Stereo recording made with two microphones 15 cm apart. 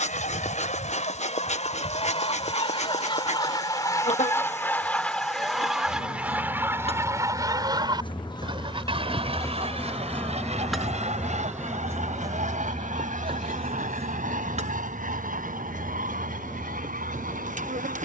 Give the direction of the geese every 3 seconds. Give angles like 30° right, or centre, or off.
50° left, 10° left, 20° right, 50° right, 60° right, 70° right.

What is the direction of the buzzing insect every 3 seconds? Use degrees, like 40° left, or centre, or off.
50° left, 50° left, 40° left, centre, 40° right, 50° right.